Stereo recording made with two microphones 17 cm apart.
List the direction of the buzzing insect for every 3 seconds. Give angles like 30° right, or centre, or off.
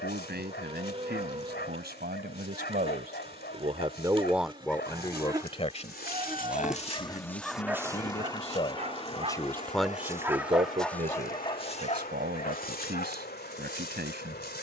40° right, 30° right, 10° left, 50° left, 70° left.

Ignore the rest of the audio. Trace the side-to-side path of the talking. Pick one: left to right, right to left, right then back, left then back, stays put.
left then back.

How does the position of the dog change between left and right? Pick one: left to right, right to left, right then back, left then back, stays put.
right then back.